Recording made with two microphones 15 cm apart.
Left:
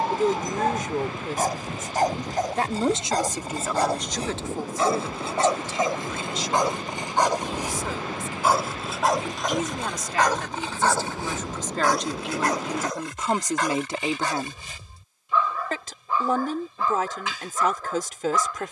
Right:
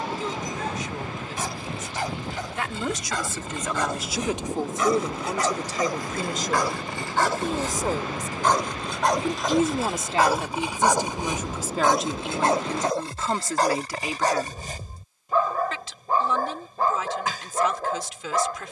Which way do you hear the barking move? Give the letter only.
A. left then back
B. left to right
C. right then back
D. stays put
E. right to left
B.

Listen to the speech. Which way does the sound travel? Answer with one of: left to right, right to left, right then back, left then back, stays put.
right then back.